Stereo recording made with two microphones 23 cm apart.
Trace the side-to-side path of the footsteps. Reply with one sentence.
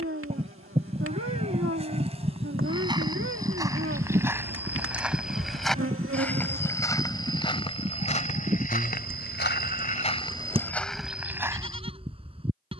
You can hear the footsteps go left and come back.